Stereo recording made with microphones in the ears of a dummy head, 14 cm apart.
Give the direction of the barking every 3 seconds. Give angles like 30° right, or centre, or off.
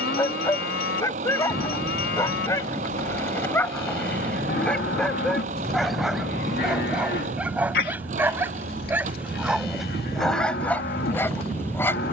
20° left, 10° left, 10° right, centre.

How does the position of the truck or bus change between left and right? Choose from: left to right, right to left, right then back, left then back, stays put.
stays put.